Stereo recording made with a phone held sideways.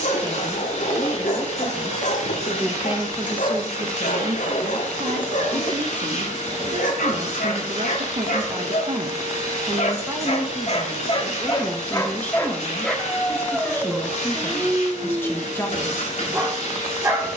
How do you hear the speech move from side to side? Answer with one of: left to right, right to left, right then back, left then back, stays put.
right then back.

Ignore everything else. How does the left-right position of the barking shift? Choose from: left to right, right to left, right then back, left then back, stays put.
left to right.